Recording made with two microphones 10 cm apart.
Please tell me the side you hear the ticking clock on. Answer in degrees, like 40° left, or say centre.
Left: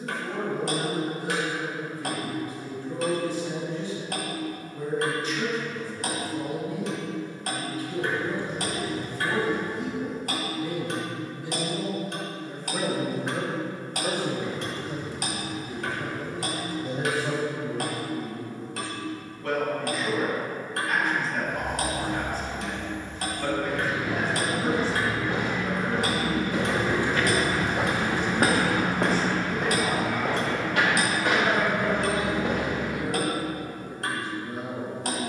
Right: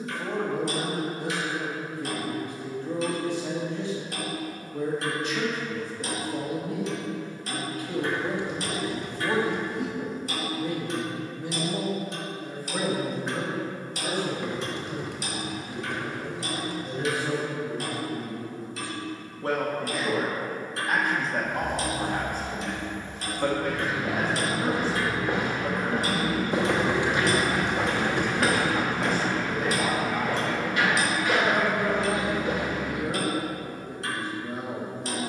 60° left.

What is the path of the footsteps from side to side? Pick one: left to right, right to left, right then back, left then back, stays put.
right to left.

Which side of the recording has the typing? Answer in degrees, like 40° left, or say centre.
70° right.